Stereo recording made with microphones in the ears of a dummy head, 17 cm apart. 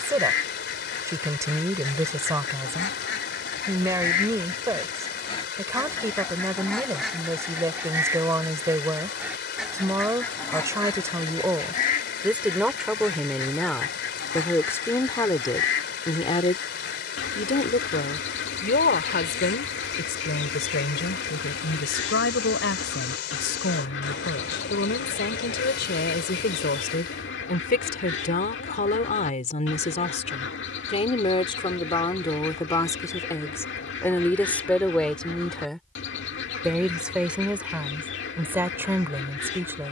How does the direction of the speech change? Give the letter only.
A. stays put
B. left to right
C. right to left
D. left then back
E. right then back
D.